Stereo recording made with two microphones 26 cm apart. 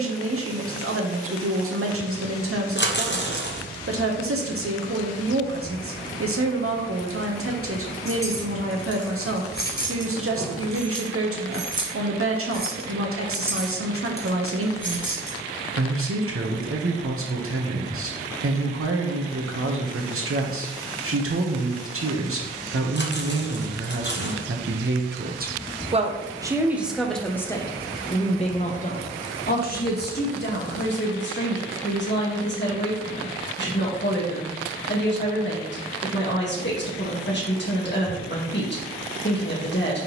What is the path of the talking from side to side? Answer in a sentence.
You can hear the talking move to the left.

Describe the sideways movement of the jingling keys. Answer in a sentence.
In this clip you hear the jingling keys move from left to right and back again.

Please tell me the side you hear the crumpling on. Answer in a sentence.
In this clip you hear the crumpling on the left.